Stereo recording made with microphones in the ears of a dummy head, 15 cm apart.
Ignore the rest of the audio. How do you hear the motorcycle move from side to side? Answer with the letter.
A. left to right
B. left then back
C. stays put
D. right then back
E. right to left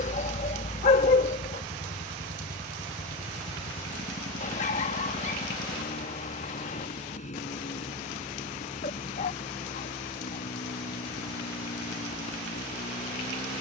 C.